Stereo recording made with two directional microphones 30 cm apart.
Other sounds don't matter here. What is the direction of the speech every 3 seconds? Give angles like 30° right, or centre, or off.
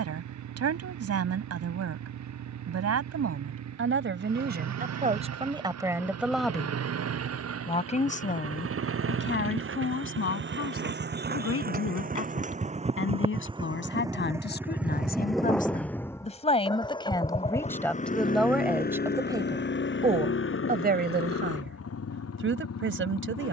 50° right, 30° right, 10° left, 40° left, 40° left, 20° left, 10° right, 40° right.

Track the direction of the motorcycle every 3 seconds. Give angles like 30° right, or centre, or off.
60° right, 60° right, 50° right, 40° right, 10° right, 10° left, 30° left, 50° left.